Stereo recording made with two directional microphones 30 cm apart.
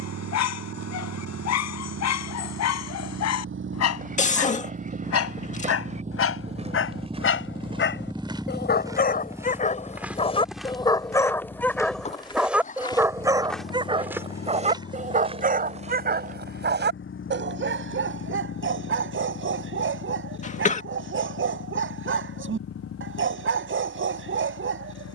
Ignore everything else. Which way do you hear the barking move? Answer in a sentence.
In this clip you hear the barking go from the left side to the right.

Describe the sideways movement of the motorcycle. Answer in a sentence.
You can hear the motorcycle go from the right side to the left.